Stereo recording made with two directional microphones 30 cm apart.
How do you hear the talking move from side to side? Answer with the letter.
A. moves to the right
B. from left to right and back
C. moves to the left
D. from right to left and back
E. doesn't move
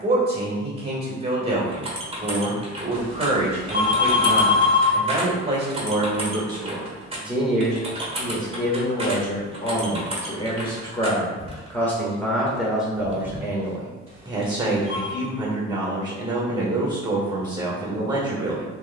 D.